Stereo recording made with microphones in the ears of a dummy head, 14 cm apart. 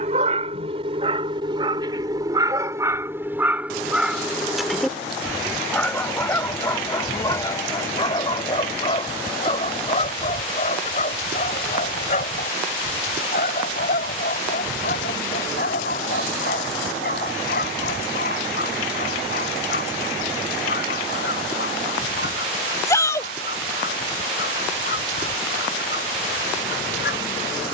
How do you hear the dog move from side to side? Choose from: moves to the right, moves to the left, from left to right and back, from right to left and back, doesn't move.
moves to the left.